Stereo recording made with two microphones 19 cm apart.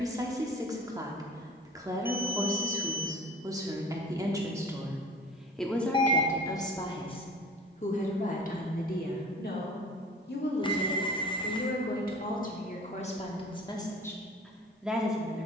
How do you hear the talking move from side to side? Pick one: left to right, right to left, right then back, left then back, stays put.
left then back.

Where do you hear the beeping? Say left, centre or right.
left.